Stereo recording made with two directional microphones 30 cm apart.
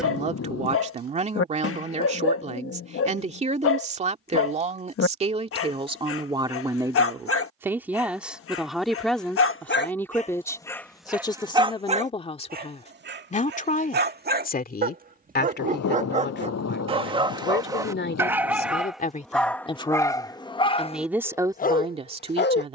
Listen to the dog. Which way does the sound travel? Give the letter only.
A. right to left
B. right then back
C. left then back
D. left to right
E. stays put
B.